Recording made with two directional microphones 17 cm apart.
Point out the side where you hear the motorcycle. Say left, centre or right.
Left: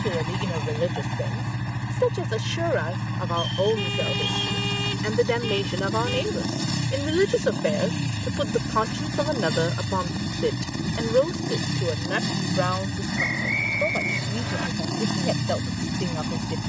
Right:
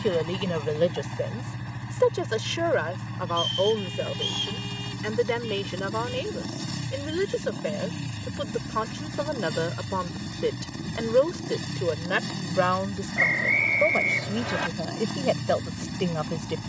left.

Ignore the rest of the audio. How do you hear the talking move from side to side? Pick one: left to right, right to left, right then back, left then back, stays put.
left then back.